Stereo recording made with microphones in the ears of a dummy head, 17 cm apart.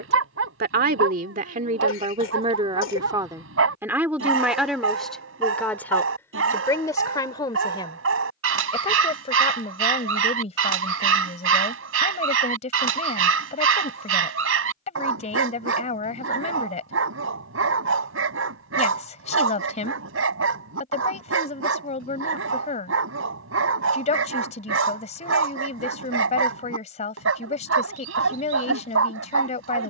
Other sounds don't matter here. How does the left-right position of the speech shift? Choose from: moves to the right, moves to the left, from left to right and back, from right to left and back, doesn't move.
moves to the left.